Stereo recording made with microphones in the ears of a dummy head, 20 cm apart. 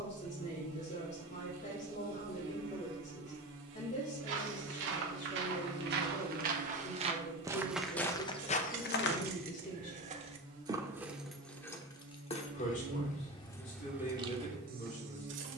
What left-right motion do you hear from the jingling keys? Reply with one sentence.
In this clip you hear the jingling keys go left and come back.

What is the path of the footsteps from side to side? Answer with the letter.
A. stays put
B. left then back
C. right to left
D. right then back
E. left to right
C.